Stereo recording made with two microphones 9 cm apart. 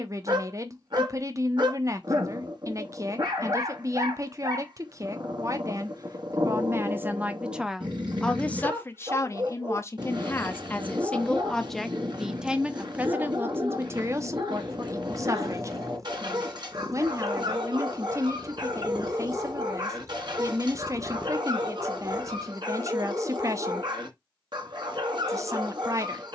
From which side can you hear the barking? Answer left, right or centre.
right.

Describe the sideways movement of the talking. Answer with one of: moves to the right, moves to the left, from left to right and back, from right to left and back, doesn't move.
from right to left and back.